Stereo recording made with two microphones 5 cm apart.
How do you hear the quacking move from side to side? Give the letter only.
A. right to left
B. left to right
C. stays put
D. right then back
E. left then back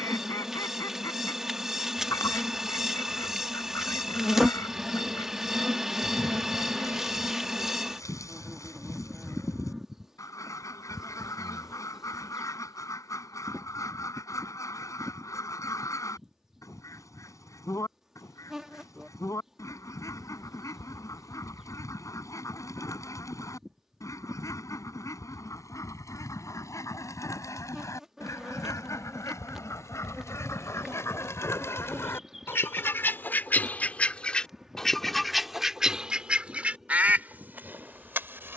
B.